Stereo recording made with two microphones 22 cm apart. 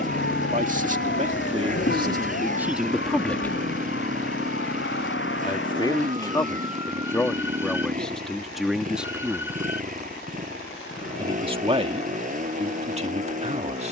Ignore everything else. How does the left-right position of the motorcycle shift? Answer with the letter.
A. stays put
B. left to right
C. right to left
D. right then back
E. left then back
A.